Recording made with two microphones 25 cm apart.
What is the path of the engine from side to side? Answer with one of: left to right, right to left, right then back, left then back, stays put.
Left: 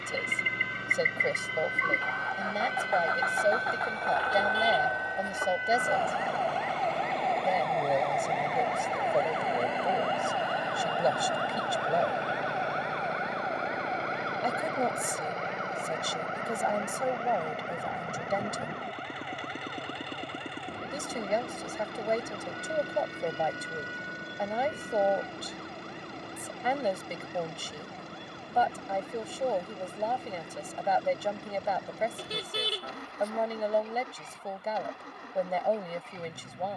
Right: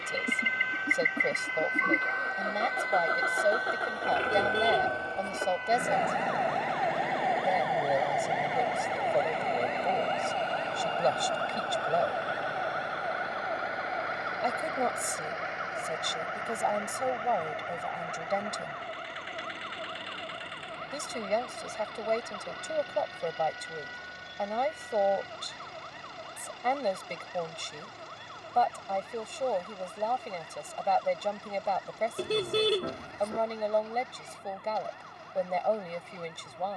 right to left.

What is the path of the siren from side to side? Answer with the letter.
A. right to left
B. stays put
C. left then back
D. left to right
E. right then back
D.